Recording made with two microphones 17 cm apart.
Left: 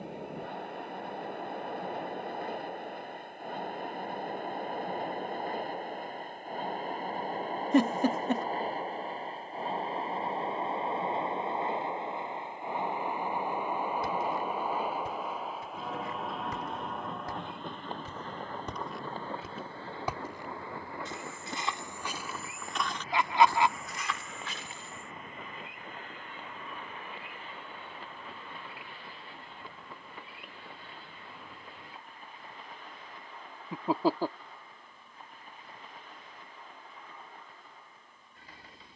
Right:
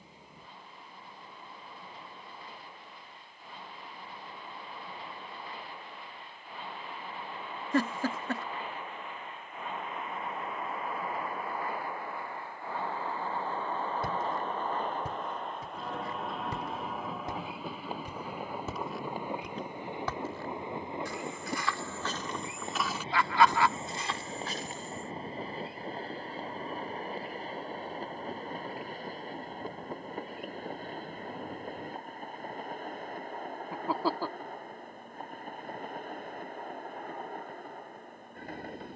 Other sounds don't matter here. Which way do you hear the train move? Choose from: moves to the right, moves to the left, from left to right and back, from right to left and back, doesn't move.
moves to the right.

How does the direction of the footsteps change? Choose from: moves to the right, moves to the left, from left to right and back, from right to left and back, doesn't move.
from right to left and back.